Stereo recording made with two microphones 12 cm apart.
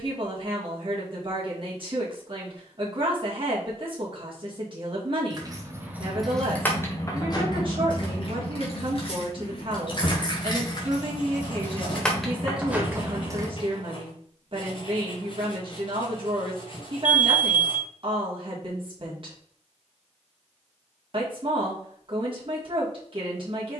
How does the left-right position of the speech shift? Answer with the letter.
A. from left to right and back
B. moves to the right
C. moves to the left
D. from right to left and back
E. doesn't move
E.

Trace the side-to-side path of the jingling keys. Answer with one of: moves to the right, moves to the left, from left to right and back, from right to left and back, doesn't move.
from right to left and back.